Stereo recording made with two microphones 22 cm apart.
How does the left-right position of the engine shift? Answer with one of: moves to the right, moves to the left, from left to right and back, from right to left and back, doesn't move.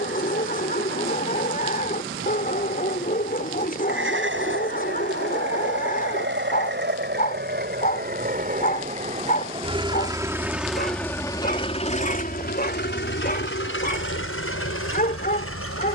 moves to the left.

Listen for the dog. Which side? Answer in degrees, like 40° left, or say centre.
40° left.